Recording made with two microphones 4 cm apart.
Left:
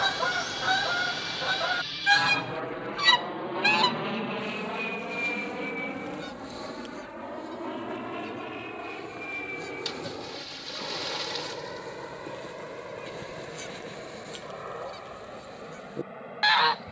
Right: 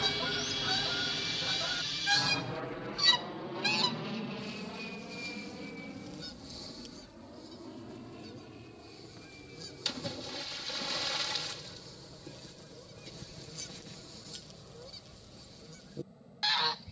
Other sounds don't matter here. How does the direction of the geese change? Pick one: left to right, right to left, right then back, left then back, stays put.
stays put.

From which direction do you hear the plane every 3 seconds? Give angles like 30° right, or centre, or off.
centre, 40° left, 50° left, 60° left, 60° left, 60° left.